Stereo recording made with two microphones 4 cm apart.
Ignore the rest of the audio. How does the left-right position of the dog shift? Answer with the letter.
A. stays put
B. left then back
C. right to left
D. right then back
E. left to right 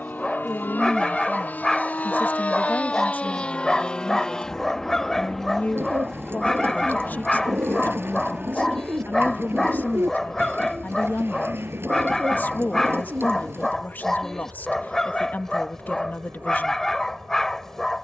A.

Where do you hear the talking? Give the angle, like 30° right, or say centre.
40° left.